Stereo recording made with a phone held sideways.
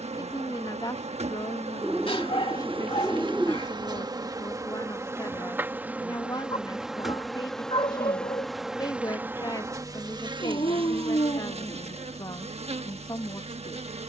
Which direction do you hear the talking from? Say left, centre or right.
left.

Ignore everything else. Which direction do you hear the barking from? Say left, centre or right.
left.